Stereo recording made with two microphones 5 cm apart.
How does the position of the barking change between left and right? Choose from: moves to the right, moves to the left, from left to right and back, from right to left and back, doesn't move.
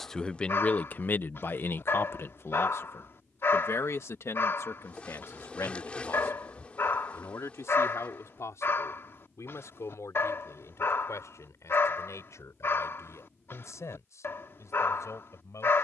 doesn't move.